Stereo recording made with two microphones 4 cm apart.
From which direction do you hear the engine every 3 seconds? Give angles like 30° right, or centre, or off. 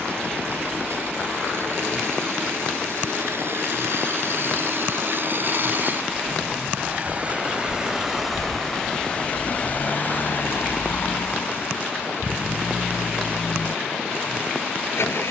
70° right, 60° right, 20° right, 50° left, 70° left.